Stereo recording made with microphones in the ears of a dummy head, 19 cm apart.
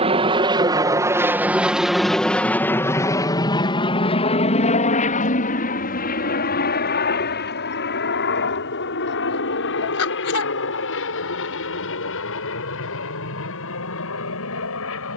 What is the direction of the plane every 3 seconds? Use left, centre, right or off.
centre, left, left, left, left.